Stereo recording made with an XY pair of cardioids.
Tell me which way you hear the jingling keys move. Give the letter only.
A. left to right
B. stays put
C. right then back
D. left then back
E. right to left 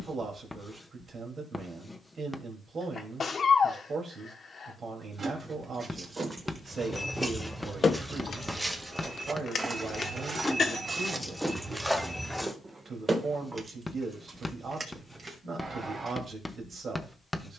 D.